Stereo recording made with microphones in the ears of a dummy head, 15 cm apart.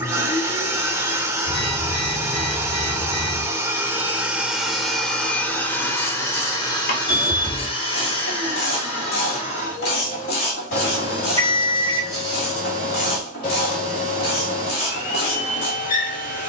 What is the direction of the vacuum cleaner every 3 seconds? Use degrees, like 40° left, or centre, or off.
20° right, centre, 30° left, 50° left, 50° left, 50° left.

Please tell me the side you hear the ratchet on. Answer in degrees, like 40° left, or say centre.
60° left.